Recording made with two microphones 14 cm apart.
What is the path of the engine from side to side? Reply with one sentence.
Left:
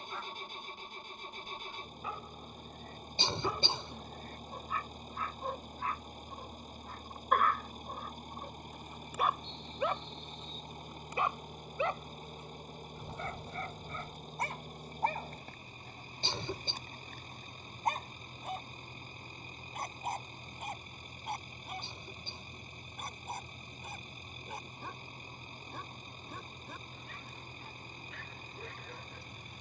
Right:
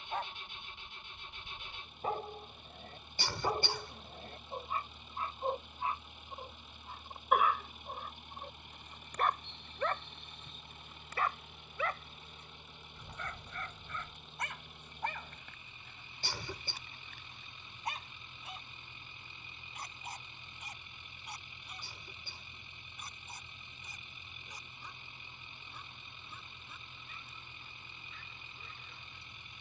You can hear the engine stay in one place.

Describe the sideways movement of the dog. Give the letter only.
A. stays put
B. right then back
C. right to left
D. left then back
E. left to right
C.